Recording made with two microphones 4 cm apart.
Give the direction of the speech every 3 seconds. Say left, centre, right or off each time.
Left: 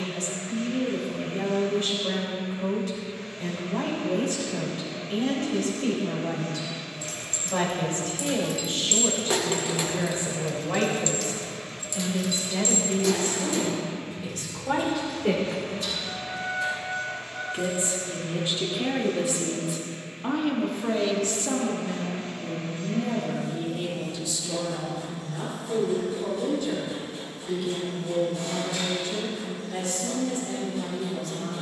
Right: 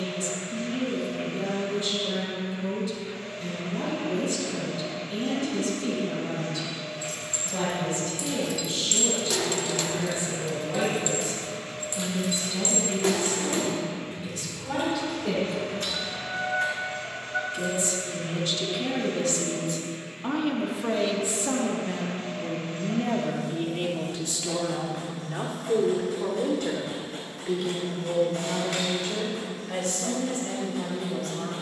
left, left, left, left, left, left, centre, right, right, right, right.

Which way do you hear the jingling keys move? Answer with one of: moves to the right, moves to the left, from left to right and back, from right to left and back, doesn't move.
moves to the right.